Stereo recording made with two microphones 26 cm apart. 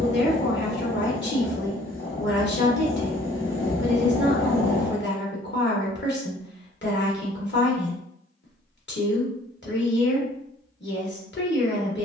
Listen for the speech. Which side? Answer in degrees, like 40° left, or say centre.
40° left.